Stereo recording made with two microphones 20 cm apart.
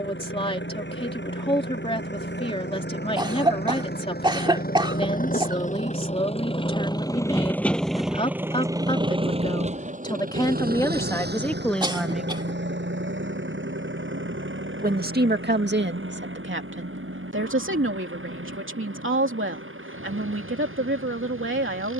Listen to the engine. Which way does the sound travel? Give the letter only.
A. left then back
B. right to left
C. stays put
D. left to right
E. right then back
D.